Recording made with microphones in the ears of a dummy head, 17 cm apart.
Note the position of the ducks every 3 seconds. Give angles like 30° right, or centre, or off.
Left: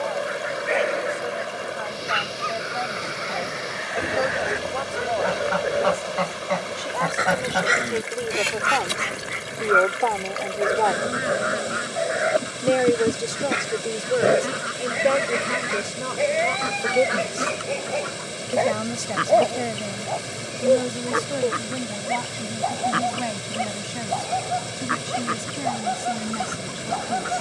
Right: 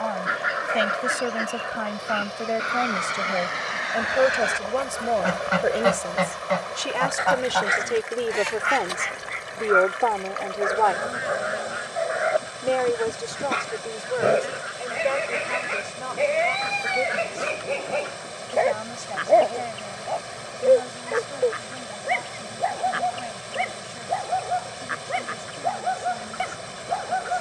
70° right, 50° right, 20° left, 60° left, 60° left, 60° left, 60° left, 60° left, 60° left.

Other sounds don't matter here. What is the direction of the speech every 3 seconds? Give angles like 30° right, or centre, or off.
50° right, 40° right, 20° right, centre, 30° left, 50° left, 60° left, 70° left, 70° left.